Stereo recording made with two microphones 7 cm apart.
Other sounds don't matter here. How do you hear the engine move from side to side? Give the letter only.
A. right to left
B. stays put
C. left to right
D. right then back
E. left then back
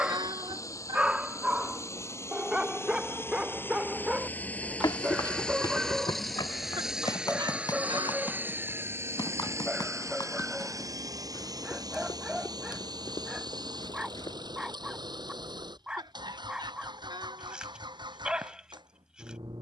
C.